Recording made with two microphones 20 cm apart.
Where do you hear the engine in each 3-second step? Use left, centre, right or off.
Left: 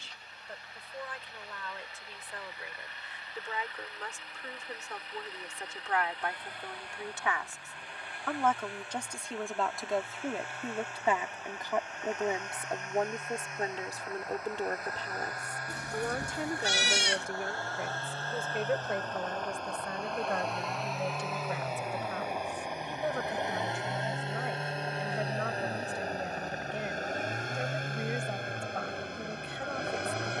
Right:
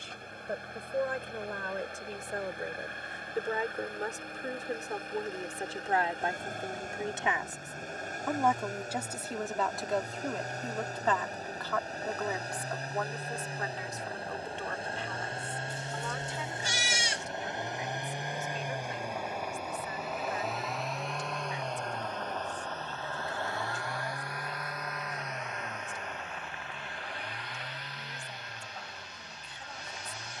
right, right, right, right, right, right, centre, centre, left, left.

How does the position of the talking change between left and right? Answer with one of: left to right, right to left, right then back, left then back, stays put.
right to left.